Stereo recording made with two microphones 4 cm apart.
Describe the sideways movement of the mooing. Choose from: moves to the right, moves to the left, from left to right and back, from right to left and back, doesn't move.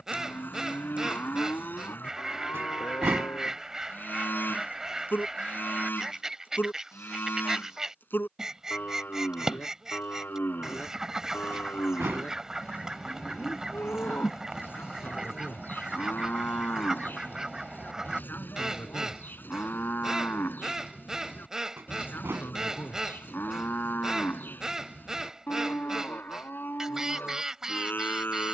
doesn't move.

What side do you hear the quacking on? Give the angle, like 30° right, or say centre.
10° right.